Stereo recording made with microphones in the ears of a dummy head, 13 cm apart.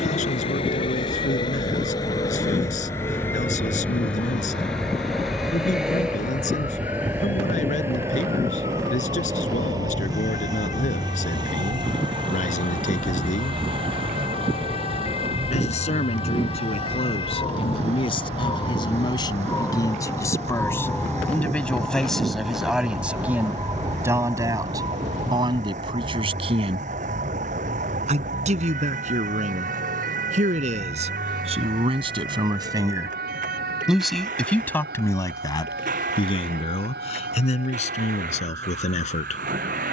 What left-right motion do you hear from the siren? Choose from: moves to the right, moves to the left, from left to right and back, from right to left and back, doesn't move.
moves to the right.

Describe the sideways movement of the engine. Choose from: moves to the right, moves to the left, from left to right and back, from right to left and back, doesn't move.
moves to the right.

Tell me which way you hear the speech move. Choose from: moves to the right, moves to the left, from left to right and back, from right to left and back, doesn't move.
from left to right and back.